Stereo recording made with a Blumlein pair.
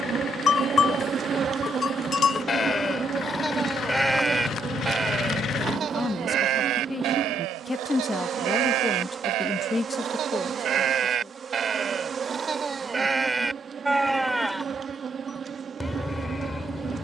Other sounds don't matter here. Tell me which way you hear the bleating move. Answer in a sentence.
You can hear the bleating move from left to right and back again.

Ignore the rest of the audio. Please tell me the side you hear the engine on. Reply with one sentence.
In this clip you hear the engine on the left.